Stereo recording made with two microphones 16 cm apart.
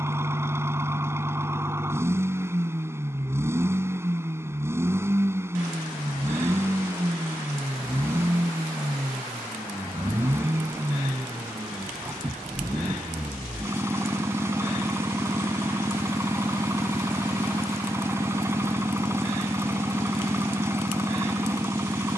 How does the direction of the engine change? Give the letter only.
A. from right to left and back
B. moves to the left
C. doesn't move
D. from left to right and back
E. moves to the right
C.